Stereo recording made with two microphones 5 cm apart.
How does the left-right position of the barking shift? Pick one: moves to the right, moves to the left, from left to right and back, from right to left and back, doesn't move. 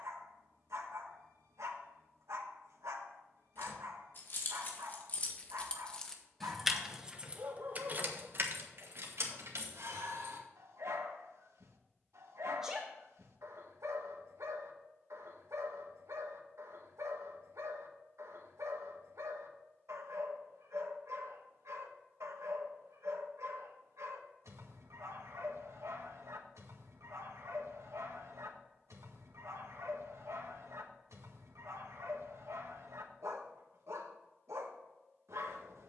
doesn't move.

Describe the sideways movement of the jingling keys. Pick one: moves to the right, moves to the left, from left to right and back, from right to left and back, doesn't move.
moves to the right.